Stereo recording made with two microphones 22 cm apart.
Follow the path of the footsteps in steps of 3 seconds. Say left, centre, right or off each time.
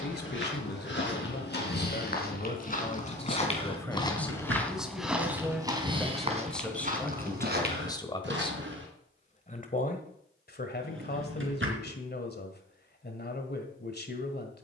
left, centre, right, off, off.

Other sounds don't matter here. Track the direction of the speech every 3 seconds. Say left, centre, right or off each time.
left, centre, centre, left, left.